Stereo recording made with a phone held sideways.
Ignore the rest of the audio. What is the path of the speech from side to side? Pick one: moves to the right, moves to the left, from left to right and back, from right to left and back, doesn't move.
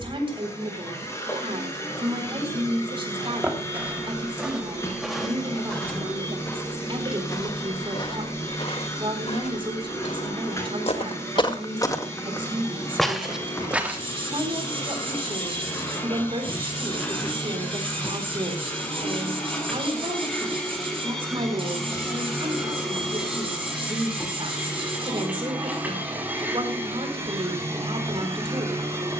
doesn't move.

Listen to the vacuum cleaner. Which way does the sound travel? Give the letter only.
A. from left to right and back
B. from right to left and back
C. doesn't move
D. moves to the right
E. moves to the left
D.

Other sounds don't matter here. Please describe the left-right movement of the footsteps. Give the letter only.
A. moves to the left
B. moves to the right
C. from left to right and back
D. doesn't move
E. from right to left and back
E.